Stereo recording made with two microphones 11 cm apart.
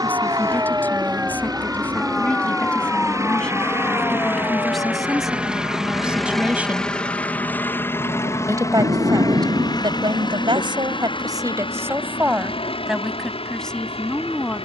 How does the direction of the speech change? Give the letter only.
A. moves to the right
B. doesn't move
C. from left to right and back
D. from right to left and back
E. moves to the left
C.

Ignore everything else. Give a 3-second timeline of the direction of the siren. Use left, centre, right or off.
centre, left, left, left, left.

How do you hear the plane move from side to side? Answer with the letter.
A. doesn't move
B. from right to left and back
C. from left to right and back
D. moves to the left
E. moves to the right
D.